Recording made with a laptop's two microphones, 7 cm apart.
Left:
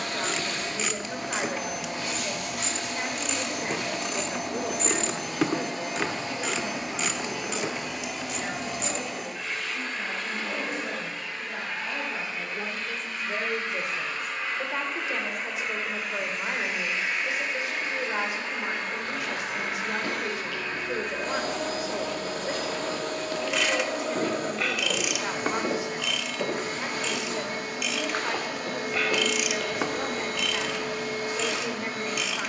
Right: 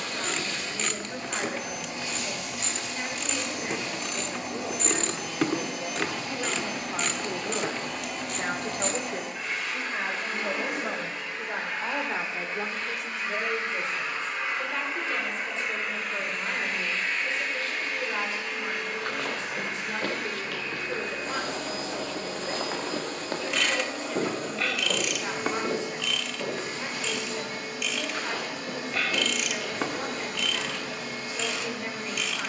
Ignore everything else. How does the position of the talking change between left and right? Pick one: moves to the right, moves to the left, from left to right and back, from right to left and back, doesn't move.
from left to right and back.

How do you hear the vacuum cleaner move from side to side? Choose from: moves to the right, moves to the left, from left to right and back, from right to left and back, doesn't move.
from left to right and back.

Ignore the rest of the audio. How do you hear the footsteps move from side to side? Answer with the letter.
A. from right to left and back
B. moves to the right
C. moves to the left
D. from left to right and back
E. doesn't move
C.